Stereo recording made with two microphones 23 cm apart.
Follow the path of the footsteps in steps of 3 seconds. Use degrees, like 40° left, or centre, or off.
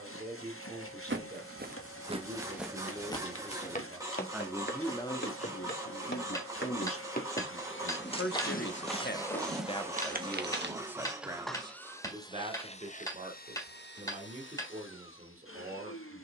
30° right, 40° left, 30° left, 30° right, off, off.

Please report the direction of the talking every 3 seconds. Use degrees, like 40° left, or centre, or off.
30° right, centre, 70° left, 10° left, 30° right, 30° right.